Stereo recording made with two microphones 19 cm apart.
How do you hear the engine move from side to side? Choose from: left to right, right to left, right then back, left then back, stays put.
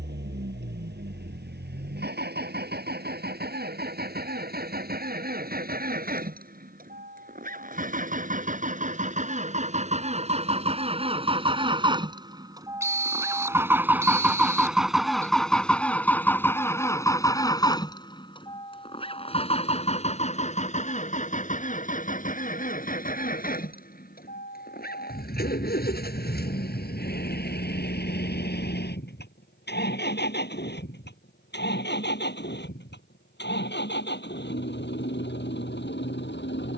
right to left.